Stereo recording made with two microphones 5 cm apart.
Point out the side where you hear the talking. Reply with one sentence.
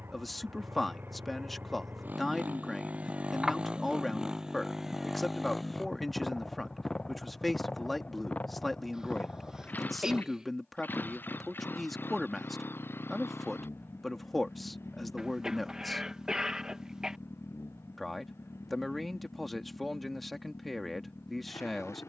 You can hear the talking in the centre.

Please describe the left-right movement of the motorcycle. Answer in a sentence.
In this clip you hear the motorcycle move to the left.